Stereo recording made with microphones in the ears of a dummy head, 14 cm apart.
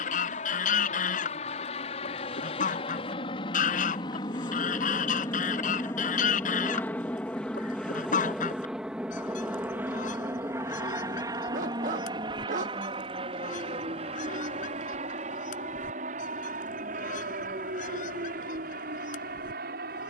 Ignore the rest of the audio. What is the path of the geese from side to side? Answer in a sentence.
In this clip you hear the geese stay put.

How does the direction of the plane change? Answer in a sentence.
In this clip you hear the plane move from left to right.